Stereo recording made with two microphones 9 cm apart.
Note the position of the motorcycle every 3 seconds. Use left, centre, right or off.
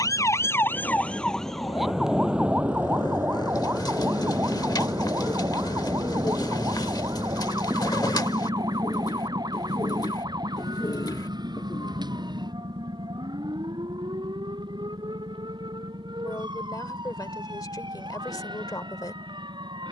left, left, centre, right, right, right, right.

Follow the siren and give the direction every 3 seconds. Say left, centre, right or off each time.
centre, right, right, right, right, right, right.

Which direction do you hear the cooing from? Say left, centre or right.
left.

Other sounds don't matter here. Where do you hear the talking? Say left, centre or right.
left.